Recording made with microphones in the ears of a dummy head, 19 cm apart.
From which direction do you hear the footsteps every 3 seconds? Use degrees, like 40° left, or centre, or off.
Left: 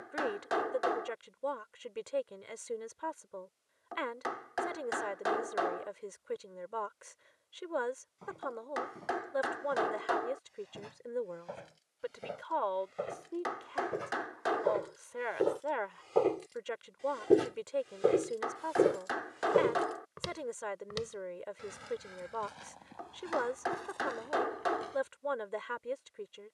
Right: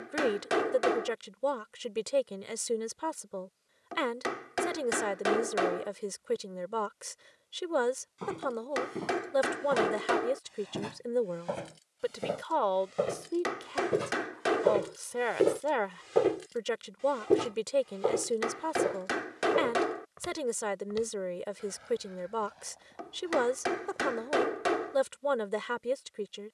off, off, 70° right, 60° right, 50° right, 10° right, 40° left, 70° left, 70° left.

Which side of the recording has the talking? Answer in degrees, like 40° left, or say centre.
50° right.